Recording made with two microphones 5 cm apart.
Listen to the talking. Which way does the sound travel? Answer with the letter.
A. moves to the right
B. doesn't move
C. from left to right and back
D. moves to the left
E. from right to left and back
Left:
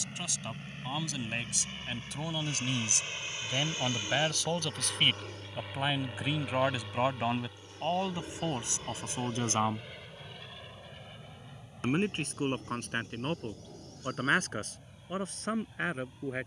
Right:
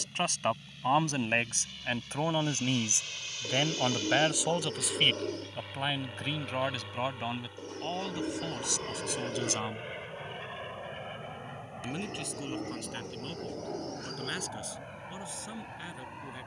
D.